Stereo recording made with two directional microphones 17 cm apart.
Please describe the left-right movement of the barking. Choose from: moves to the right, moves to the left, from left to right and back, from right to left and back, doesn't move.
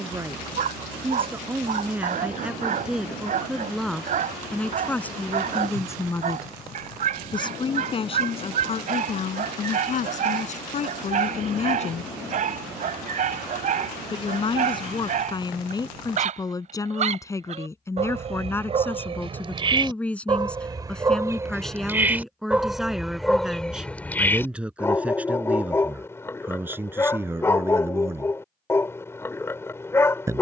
moves to the left.